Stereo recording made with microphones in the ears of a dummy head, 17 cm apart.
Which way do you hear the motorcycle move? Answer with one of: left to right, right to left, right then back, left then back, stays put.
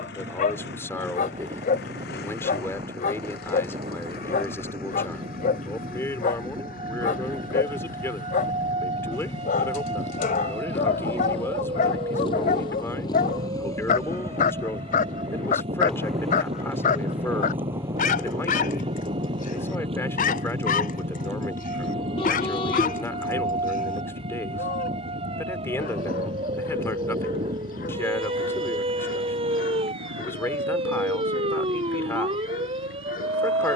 left to right.